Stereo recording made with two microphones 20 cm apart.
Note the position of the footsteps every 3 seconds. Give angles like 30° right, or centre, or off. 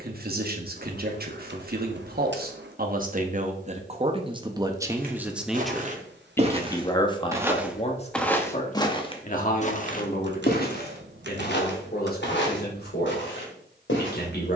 off, 40° right, 10° right, 50° left, 70° left.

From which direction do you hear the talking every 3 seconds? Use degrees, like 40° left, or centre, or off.
50° right, 20° right, 30° left, 50° left, 60° left.